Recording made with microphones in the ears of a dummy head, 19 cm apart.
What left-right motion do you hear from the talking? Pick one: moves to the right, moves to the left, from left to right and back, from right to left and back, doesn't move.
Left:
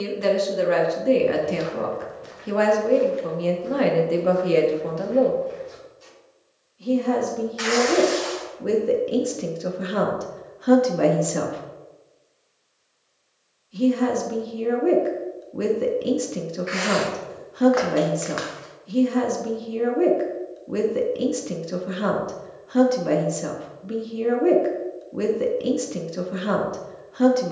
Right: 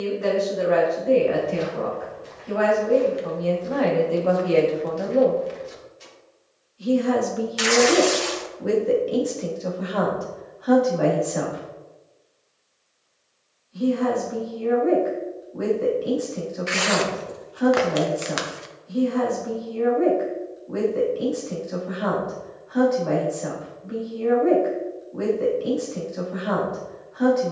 from left to right and back.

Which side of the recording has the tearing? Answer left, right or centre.
right.